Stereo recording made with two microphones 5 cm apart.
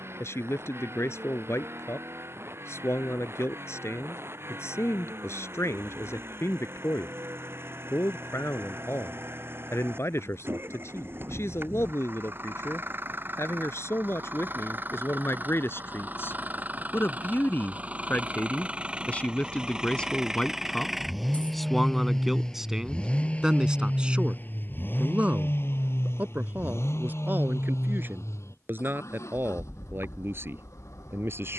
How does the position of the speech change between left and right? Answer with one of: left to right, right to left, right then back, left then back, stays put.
left to right.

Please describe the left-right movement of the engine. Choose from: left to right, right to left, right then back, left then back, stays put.
right to left.